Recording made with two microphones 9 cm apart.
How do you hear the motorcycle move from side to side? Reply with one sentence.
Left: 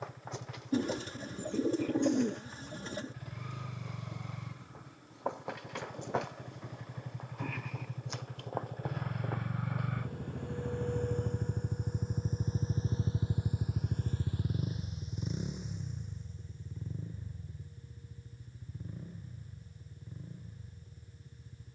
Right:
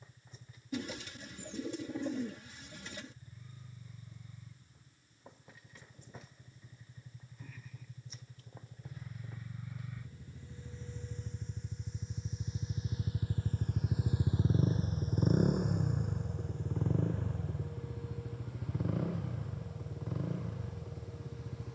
In this clip you hear the motorcycle move from left to right.